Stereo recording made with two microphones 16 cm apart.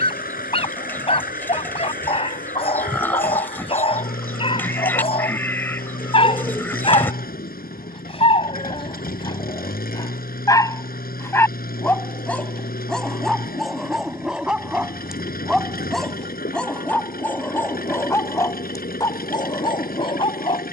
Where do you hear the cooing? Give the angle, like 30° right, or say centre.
10° left.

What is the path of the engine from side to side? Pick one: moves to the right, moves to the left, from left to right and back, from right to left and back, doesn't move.
doesn't move.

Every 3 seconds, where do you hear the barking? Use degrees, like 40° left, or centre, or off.
40° left, 40° left, 30° left, 20° left, centre, 10° left, 30° left.